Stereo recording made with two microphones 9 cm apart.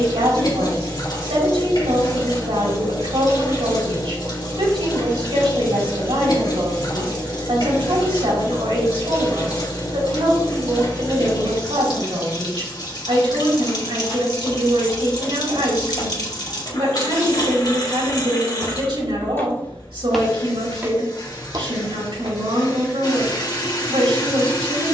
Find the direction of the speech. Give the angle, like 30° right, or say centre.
80° right.